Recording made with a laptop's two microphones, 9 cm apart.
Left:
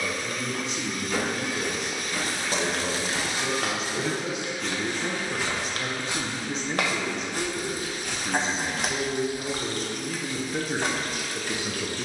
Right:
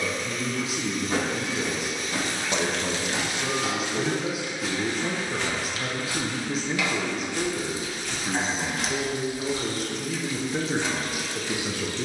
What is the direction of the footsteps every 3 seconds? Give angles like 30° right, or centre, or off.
30° right, centre, 40° left, 10° right.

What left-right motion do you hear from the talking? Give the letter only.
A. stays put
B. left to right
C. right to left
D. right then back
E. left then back
A.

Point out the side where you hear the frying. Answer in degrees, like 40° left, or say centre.
50° left.